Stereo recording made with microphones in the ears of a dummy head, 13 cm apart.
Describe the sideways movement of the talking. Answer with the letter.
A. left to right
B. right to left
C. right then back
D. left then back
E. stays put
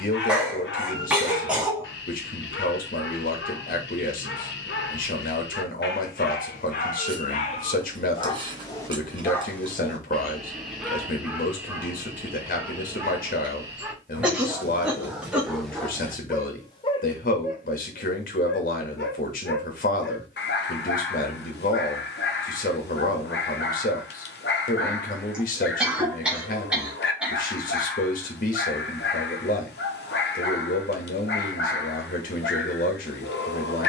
E.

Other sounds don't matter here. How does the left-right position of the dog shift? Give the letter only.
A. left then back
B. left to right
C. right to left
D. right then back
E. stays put
D.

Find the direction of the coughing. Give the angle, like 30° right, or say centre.
10° right.